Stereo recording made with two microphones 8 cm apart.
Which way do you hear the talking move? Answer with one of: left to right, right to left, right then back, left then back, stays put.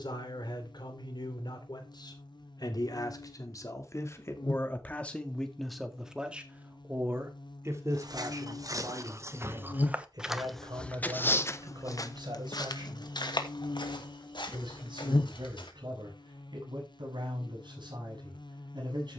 left to right.